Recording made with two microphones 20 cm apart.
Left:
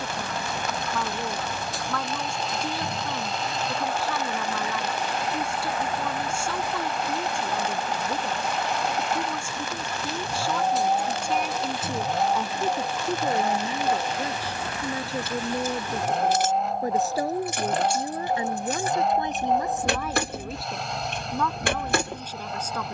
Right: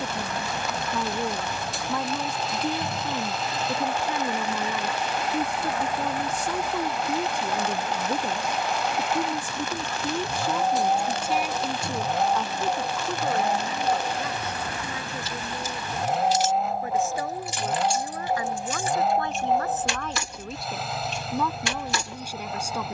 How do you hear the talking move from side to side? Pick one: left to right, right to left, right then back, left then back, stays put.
left then back.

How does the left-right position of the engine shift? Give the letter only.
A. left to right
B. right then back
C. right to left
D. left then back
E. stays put
E.